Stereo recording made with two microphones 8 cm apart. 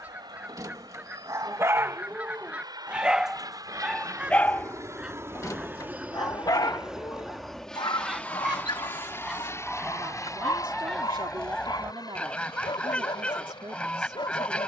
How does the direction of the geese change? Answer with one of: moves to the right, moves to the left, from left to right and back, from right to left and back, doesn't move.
moves to the left.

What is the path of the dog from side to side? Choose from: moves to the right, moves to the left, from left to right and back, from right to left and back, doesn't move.
moves to the left.